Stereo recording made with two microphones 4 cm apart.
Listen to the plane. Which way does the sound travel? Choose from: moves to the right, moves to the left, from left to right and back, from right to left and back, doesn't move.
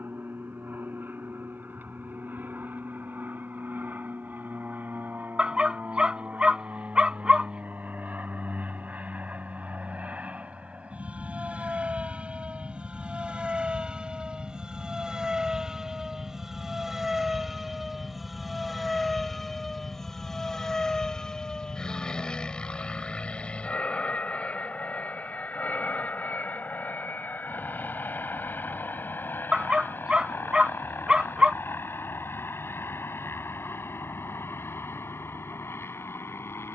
moves to the left.